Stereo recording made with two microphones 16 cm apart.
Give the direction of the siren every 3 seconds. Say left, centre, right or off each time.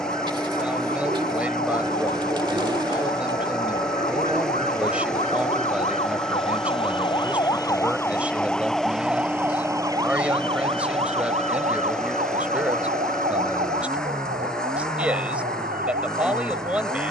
left, left, left, right, right, right.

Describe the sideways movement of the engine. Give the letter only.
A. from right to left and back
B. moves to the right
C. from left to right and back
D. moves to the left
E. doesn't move
E.